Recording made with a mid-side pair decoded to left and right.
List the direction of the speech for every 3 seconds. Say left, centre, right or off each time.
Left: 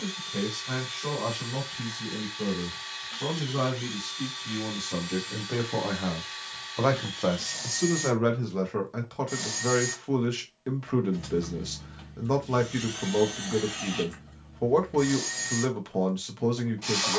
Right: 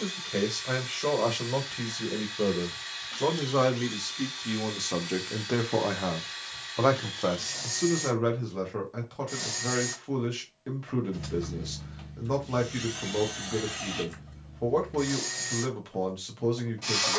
right, right, centre, left, left, left.